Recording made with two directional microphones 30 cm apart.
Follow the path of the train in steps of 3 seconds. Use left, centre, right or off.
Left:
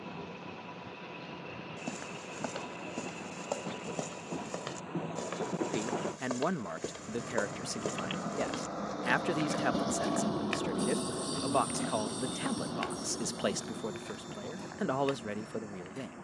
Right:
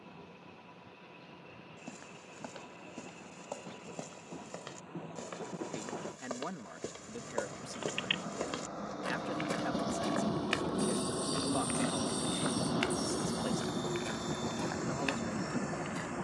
left, left, left, centre, right, right.